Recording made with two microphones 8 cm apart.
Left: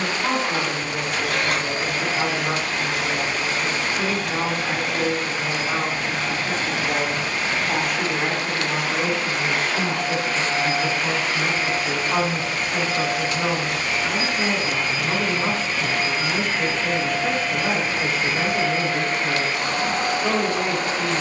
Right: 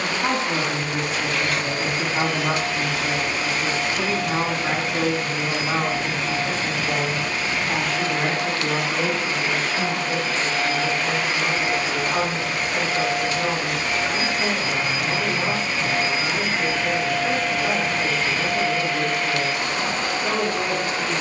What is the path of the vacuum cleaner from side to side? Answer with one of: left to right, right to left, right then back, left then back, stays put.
right then back.